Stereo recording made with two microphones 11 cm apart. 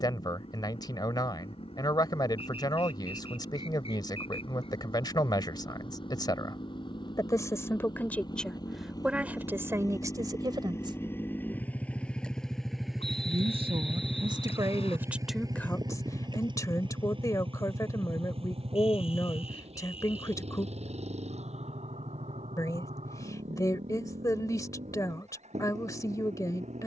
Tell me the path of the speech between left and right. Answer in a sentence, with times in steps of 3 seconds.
You can hear the speech on the left from 0 s, on the right from 9 s and on the left from 15 s.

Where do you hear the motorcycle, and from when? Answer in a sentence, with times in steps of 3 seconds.
You can hear the motorcycle on the left from 0 s, in the centre from 12 s and on the right from 15 s.